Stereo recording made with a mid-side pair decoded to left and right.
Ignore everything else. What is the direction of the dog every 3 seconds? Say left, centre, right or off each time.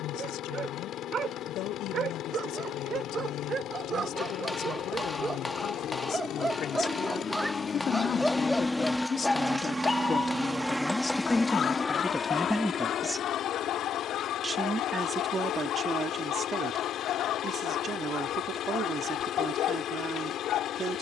right, right, centre, left, left, left, left.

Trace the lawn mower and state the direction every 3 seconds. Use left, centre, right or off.
left, left, left, centre, left, left, left.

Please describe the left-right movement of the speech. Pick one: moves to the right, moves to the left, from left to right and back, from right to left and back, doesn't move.
moves to the right.